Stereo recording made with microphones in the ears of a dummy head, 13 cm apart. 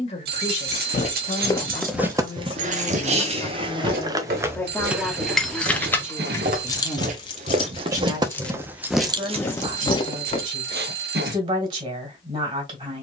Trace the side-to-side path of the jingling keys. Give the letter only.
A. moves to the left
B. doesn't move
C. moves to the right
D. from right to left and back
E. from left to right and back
D.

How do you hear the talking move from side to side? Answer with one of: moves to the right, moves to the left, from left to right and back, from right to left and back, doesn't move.
moves to the right.